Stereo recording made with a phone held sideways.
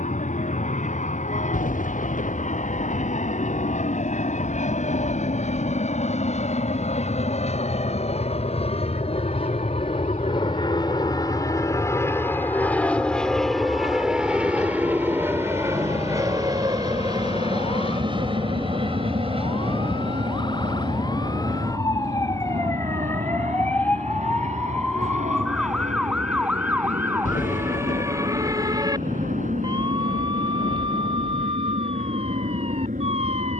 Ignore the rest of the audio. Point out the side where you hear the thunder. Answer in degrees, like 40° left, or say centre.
80° left.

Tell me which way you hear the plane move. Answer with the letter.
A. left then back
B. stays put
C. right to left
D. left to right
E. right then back
D.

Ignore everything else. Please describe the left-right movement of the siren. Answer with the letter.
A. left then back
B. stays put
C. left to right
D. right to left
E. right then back
C.